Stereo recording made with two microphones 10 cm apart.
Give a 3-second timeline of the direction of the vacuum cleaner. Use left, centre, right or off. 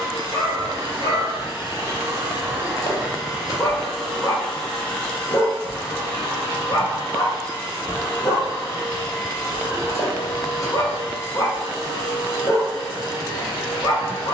right, centre, left, left, left.